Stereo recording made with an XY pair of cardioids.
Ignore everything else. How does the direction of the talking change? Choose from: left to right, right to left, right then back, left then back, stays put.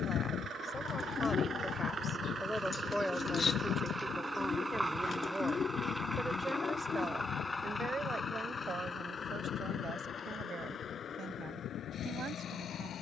left to right.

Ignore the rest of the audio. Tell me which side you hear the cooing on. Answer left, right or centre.
left.